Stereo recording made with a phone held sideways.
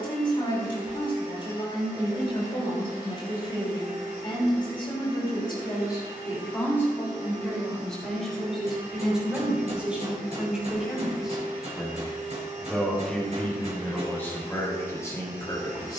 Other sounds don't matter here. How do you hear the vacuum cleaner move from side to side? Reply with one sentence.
In this clip you hear the vacuum cleaner stay put.